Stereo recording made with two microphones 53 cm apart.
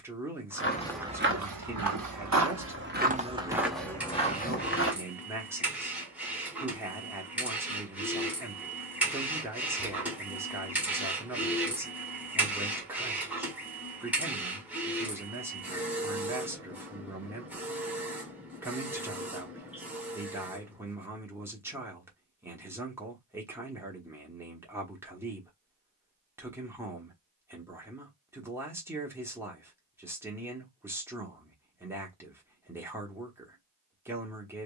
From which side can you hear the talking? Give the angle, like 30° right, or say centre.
centre.